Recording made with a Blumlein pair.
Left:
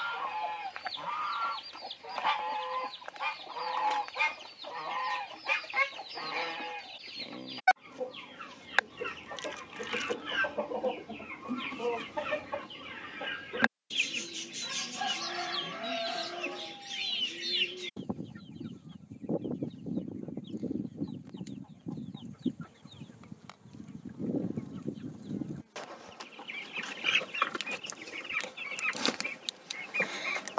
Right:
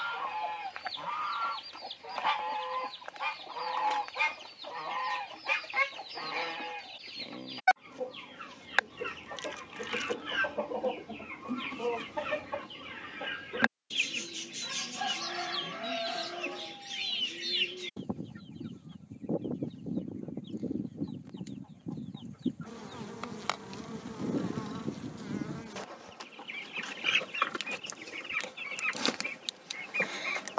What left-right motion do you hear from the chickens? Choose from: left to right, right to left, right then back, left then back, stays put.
stays put.